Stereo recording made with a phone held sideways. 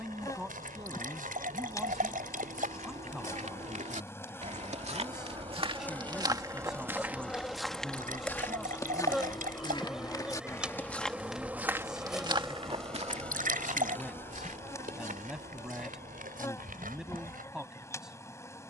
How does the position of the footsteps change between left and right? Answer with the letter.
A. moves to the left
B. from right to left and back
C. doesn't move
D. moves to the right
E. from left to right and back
B.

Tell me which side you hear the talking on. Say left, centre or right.
centre.